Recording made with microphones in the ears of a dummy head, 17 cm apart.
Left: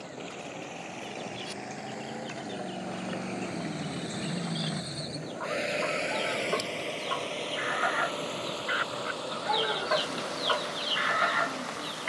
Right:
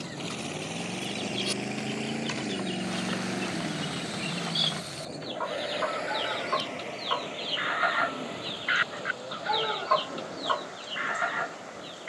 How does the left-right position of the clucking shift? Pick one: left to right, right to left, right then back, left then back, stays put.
right to left.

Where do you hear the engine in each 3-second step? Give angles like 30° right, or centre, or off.
40° right, 10° left, 50° left, 70° left.